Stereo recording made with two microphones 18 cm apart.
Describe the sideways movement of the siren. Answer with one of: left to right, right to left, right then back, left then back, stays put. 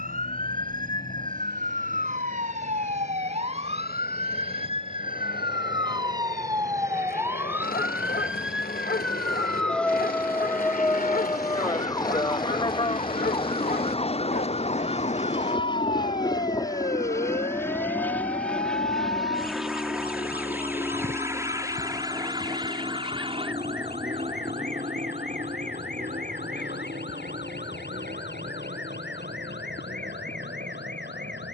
right to left.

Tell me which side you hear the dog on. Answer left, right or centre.
left.